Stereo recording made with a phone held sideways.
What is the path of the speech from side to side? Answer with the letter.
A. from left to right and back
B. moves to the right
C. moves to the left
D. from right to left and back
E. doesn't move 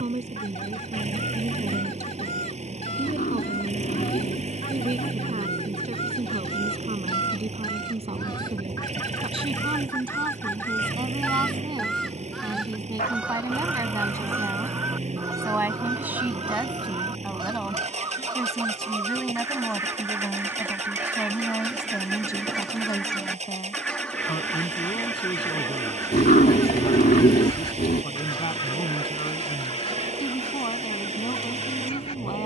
C.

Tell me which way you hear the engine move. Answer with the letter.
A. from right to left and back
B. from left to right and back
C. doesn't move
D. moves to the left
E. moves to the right
C.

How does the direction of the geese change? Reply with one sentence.
You can hear the geese move from left to right and back again.